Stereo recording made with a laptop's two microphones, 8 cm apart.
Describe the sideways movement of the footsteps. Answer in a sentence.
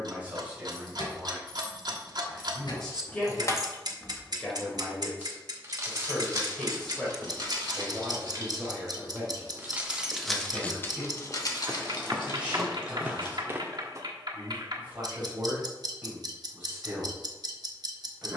In this clip you hear the footsteps go left and come back.